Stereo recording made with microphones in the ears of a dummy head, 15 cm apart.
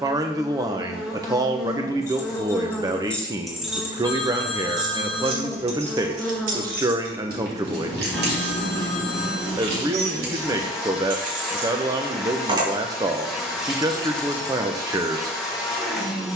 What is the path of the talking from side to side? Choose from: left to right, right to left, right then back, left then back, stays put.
stays put.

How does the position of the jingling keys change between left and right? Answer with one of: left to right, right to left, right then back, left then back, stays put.
right then back.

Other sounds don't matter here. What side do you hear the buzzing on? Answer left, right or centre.
centre.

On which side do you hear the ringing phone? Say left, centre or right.
centre.